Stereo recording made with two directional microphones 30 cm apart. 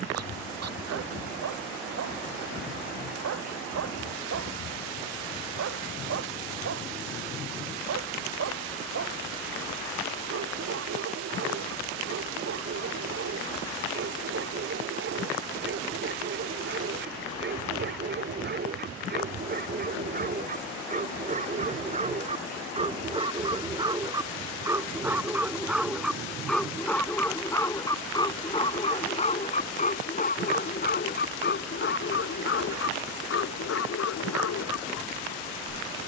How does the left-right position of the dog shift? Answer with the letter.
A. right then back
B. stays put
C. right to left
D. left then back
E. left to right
C.